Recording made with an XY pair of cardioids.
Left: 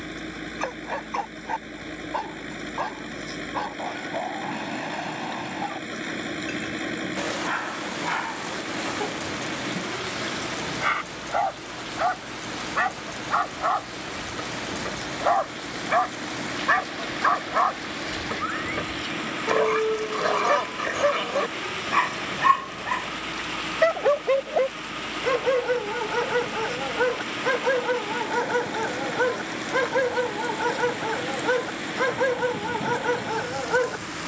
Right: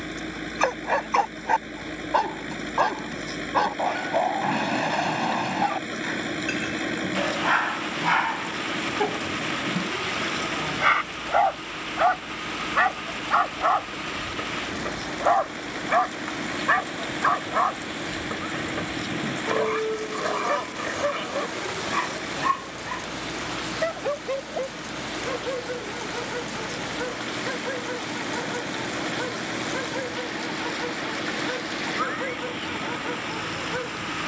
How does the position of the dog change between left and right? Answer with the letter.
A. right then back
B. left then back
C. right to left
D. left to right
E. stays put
C.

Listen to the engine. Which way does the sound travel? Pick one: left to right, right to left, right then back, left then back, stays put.
stays put.